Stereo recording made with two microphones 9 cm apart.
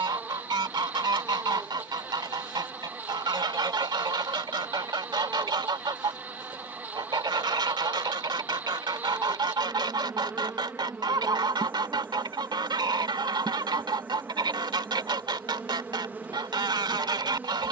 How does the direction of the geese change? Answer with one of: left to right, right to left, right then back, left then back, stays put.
stays put.